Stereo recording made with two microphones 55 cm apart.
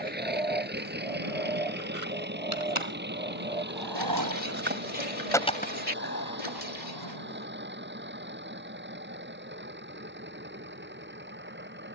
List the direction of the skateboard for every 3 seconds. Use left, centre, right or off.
right, right, left, off.